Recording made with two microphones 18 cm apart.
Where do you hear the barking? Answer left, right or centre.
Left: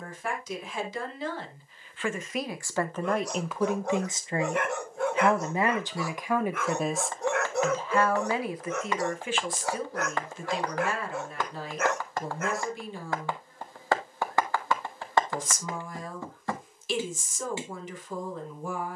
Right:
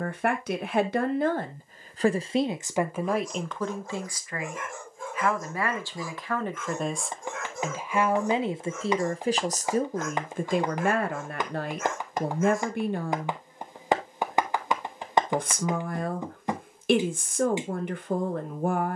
left.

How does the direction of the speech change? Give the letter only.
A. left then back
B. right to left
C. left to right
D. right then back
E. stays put
A.